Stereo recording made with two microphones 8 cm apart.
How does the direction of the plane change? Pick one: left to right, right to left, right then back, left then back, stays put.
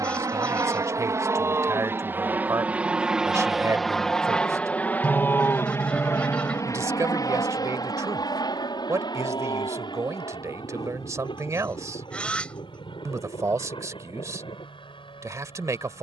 right to left.